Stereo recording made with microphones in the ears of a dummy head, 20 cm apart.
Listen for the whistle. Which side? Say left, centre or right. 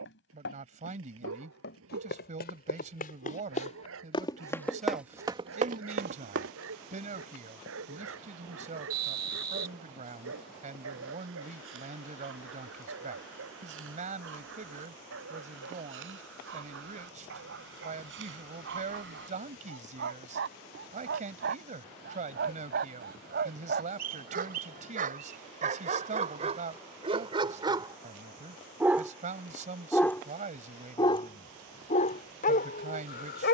right.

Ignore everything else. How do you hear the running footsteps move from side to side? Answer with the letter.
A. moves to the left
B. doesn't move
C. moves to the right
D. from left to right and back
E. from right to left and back
C.